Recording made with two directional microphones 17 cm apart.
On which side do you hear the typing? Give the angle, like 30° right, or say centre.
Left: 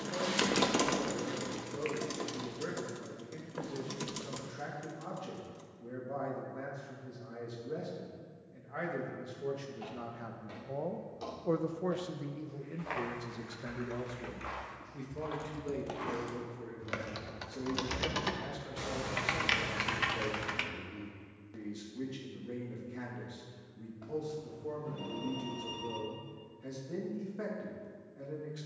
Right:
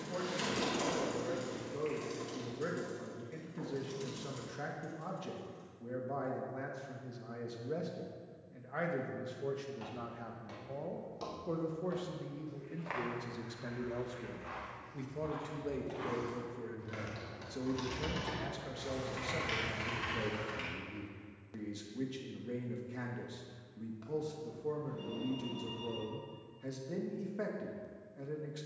60° left.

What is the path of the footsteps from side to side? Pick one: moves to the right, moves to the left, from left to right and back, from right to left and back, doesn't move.
from right to left and back.